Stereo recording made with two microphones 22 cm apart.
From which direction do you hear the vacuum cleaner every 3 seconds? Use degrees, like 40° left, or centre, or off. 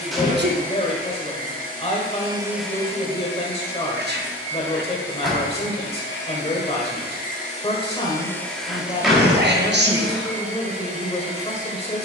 30° right, 70° left, 30° left, 30° right.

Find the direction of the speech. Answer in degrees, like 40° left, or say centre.
30° left.